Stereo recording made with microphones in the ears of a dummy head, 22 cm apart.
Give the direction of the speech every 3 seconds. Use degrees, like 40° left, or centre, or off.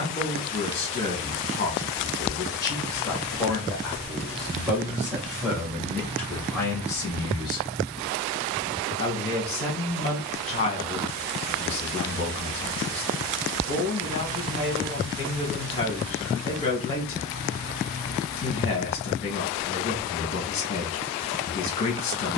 20° left, centre, 10° left, 20° left, 20° left, 20° left, 20° left, 20° left.